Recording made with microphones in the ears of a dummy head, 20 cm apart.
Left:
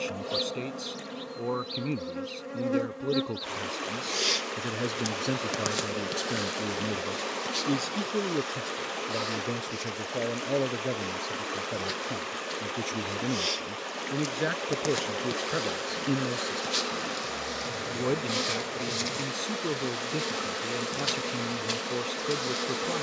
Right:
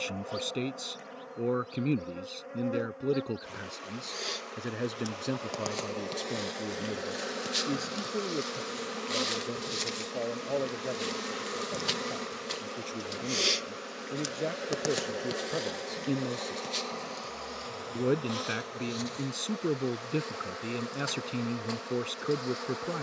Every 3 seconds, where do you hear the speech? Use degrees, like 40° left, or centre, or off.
20° right, centre, 20° left, 30° left, 20° left, 10° left, 20° right, 20° right.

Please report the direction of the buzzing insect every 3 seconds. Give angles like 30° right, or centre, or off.
50° left, 30° left, 10° right, 50° right, 20° right, 10° left, 30° left, 40° left.